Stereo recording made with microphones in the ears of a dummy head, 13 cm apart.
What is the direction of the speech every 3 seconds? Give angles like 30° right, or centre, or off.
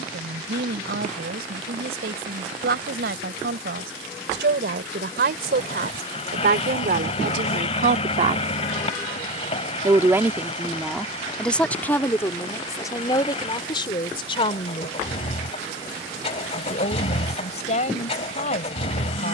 80° right, 80° right, 60° right, centre, 30° left, 50° left, 50° left.